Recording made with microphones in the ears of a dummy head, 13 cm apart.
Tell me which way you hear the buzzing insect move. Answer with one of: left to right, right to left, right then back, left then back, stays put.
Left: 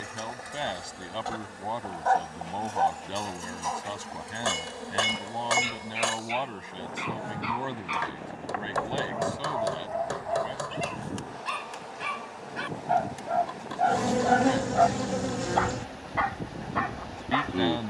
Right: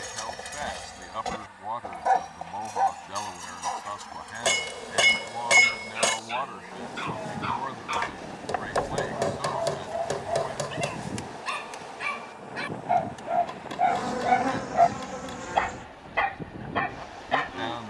right then back.